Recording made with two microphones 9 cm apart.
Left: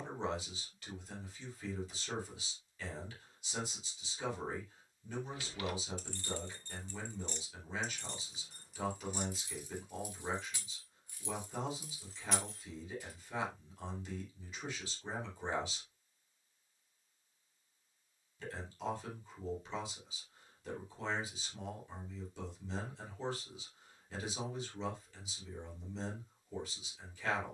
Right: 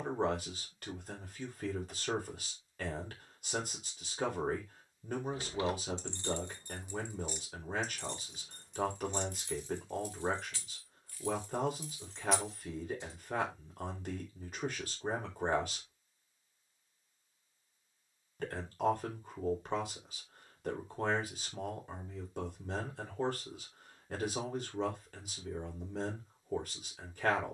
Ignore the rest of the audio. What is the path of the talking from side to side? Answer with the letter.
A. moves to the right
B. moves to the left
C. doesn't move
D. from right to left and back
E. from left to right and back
C.